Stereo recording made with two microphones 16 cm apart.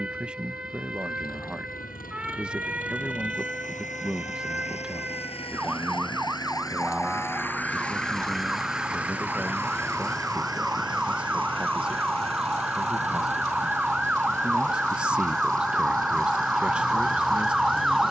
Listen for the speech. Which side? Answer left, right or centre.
centre.